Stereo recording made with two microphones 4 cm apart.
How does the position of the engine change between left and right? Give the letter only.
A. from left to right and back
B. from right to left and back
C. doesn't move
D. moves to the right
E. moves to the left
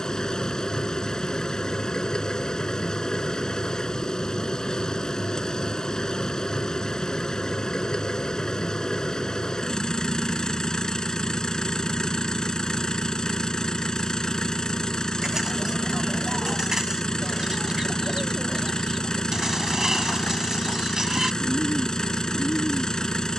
C.